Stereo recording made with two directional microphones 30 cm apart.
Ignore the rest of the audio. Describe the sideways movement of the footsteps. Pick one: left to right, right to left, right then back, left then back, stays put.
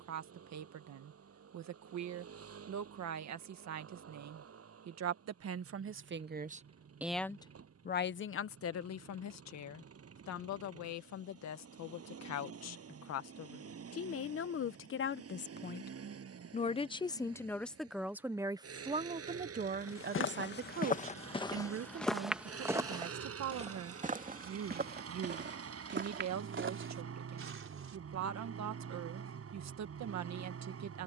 left to right.